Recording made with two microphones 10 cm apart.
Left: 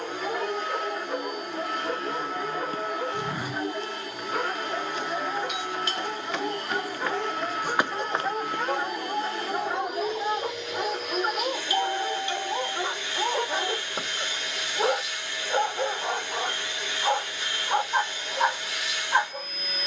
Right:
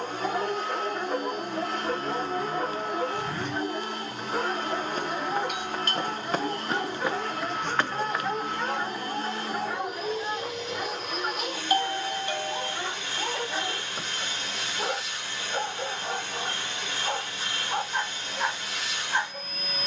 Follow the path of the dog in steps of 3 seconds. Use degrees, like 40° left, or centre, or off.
30° right, 20° right, centre, 20° left, 30° left, 30° left, 30° left.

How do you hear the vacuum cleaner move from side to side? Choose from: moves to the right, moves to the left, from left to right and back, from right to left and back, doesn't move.
doesn't move.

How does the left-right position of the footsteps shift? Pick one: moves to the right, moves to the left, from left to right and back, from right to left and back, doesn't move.
from left to right and back.